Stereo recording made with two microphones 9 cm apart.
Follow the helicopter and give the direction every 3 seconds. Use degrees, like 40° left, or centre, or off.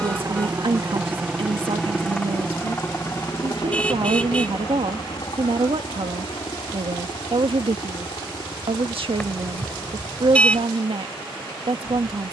centre, 50° left, 70° left, 70° left.